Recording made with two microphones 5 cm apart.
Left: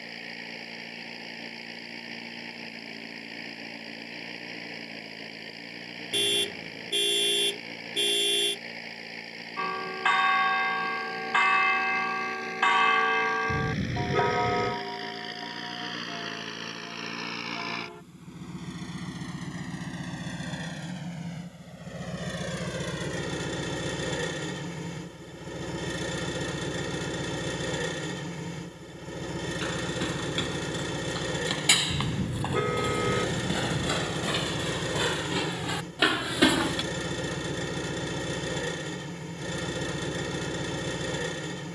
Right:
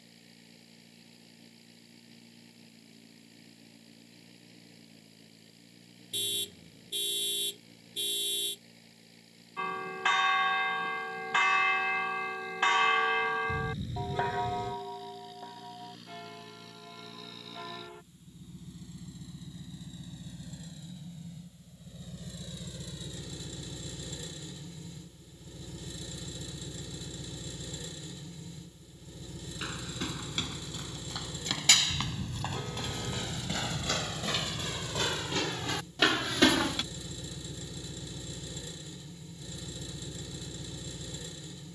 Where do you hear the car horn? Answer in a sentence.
You can hear the car horn on the left.